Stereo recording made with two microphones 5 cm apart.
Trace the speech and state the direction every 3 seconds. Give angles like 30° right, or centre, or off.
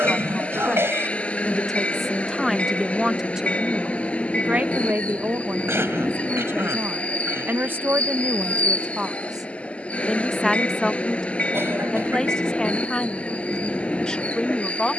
10° left, 30° right, 40° right, 10° left, 20° left.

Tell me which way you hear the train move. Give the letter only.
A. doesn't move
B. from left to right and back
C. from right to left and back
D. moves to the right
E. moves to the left
A.